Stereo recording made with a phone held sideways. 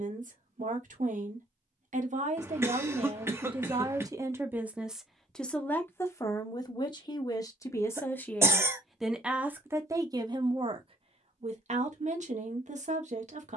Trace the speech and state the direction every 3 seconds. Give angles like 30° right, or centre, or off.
60° right, 20° right, 20° left, 30° right, 60° right.